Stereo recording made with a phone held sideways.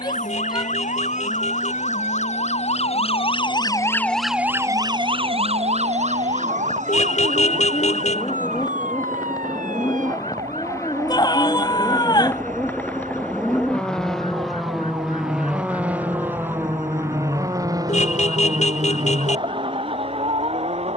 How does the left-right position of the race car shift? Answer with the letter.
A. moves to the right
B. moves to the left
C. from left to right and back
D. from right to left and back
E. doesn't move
A.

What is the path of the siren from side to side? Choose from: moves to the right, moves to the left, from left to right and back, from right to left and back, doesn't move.
moves to the right.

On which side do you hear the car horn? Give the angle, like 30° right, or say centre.
70° left.